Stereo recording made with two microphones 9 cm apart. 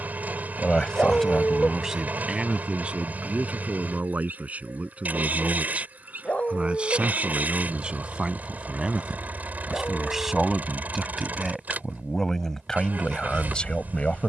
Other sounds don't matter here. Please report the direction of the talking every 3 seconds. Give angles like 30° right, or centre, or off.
centre, 20° right, 10° right, centre, 10° left.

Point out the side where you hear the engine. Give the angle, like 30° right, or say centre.
20° right.